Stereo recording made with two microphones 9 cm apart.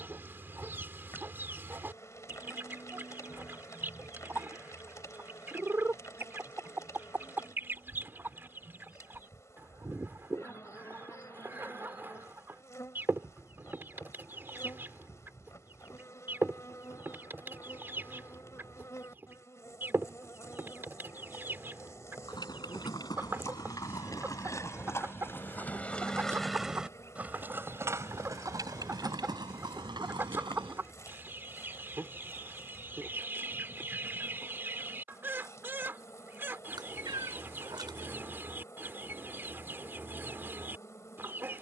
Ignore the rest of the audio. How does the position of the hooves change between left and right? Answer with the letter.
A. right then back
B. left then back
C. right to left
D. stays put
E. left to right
E.